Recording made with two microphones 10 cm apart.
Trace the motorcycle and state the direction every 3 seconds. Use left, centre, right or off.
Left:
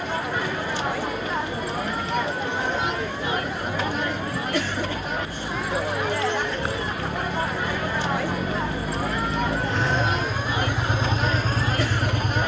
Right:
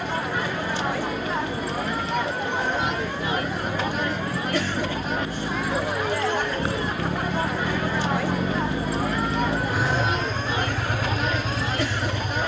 right, right, right, centre.